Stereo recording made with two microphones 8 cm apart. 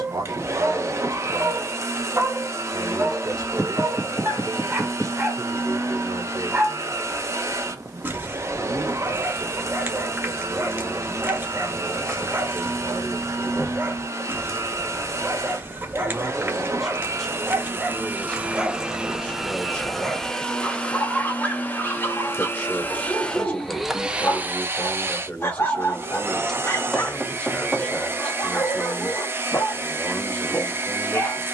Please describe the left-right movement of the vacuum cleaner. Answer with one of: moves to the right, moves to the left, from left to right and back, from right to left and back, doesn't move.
from right to left and back.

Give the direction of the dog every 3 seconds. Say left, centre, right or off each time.
right, right, right, right, right, right, centre, left, left, left, left.